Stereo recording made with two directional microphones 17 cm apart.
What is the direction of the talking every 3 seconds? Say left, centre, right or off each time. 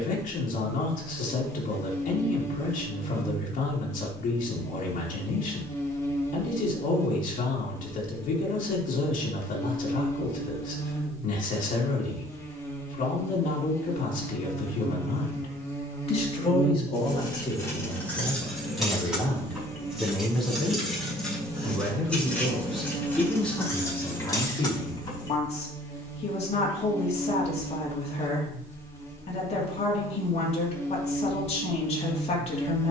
left, left, left, left, left, left, centre, centre, left, left, left.